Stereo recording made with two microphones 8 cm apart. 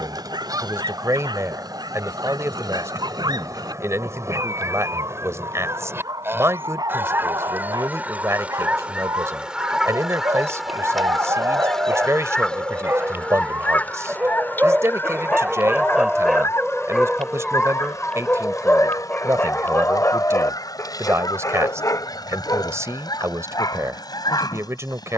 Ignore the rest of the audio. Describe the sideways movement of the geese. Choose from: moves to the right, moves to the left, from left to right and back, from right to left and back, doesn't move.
moves to the left.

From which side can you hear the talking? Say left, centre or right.
right.